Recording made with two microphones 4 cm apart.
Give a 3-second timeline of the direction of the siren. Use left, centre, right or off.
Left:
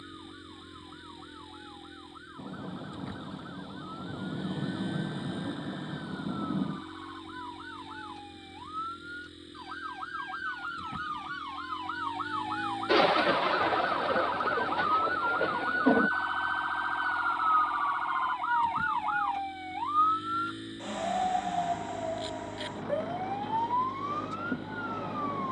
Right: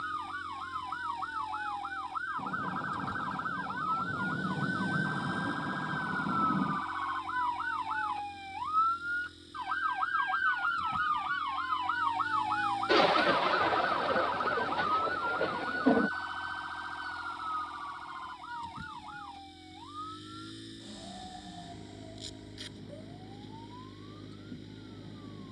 right, right, right, right, centre, left, left, left, left.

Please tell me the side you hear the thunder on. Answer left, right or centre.
centre.